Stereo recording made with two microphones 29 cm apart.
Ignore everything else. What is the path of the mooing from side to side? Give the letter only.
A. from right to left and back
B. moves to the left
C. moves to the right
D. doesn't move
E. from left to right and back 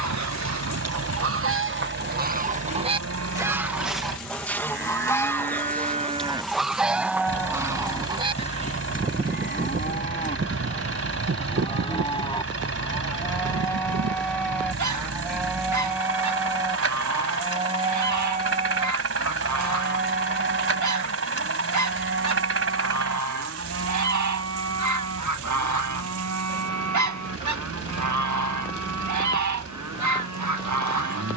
A.